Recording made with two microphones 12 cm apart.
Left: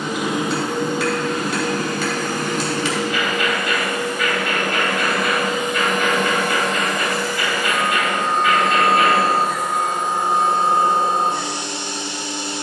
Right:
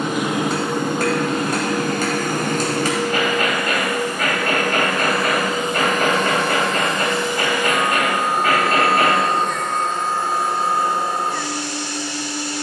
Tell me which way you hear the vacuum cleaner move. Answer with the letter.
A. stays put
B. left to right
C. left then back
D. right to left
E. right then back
D.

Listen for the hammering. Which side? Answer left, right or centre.
right.